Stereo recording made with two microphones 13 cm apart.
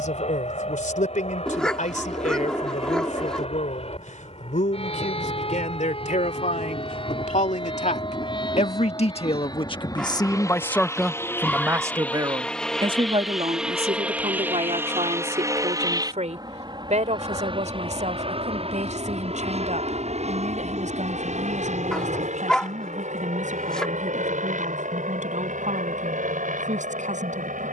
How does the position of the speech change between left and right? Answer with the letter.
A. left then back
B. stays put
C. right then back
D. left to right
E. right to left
D.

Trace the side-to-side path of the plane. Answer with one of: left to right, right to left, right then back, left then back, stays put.
left to right.